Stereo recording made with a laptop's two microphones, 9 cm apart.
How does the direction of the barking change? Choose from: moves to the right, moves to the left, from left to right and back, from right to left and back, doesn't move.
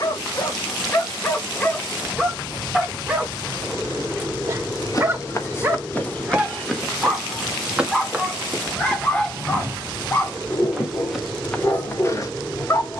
from left to right and back.